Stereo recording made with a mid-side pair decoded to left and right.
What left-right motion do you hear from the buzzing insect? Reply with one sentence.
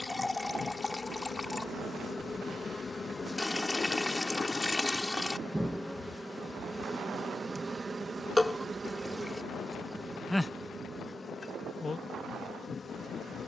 In this clip you hear the buzzing insect move from left to right and back again.